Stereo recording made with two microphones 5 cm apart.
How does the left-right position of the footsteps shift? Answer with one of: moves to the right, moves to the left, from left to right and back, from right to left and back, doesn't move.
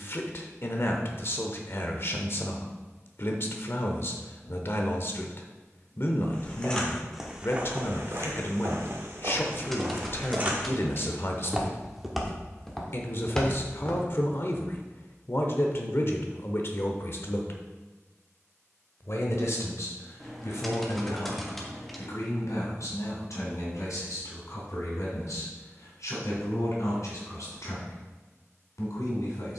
from left to right and back.